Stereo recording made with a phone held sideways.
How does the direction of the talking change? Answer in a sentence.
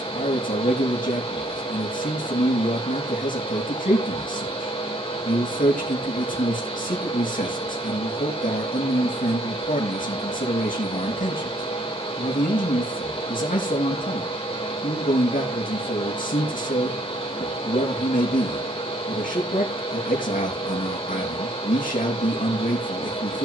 In this clip you hear the talking stay put.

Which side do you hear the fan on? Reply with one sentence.
In this clip you hear the fan on the left.